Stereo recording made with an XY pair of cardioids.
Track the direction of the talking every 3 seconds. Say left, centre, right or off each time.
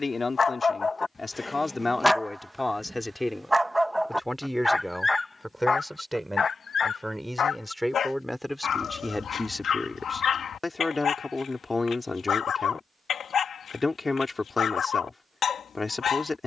left, centre, centre, left, left, left.